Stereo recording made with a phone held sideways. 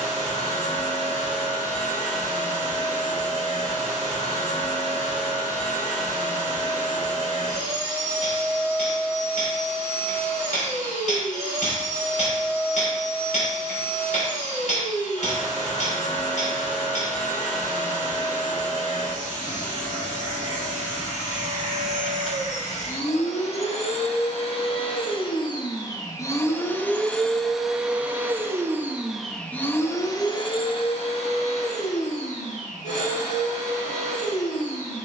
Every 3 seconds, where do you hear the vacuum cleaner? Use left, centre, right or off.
left, left, left, left, left, left, left, left, left, centre, left, left.